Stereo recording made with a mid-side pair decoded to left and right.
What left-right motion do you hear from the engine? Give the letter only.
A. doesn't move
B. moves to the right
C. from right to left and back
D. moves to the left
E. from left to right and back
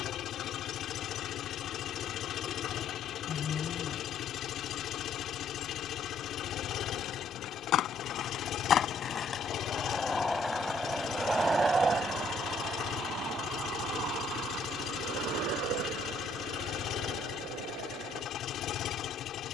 A.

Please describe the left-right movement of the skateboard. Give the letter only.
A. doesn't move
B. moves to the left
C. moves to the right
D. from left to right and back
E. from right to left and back
C.